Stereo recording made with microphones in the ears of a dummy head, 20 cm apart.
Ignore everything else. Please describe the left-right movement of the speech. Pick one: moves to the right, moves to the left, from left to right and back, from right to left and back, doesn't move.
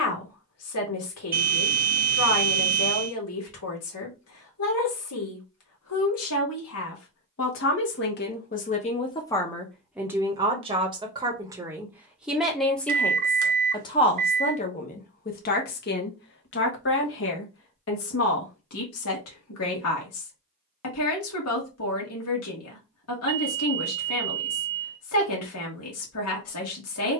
from left to right and back.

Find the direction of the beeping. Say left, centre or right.
right.